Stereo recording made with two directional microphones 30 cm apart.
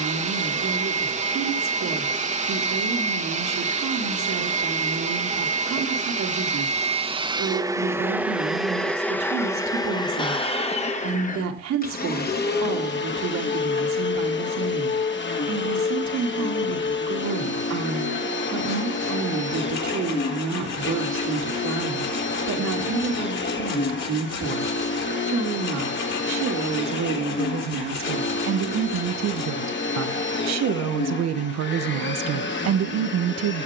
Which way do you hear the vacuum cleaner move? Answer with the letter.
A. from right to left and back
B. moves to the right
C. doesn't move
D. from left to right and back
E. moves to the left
E.